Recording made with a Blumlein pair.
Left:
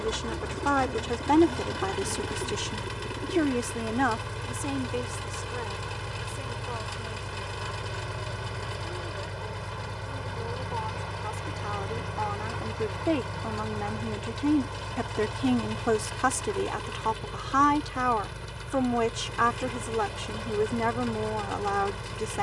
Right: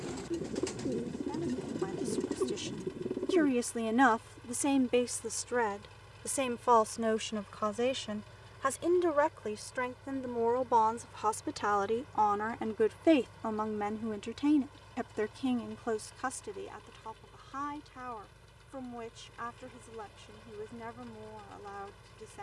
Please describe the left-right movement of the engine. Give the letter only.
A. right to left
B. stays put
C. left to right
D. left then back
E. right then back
B.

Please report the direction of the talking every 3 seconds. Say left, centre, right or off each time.
left, centre, right, right, centre, left, left, left.